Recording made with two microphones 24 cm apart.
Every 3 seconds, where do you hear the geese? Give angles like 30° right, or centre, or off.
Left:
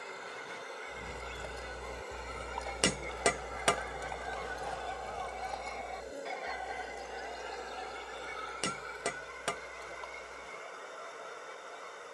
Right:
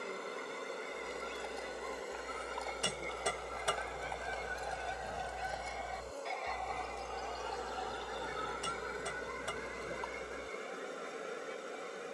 50° right, 20° right, 20° left, 40° left.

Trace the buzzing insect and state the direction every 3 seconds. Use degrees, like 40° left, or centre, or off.
20° right, 10° left, 10° right, 40° right.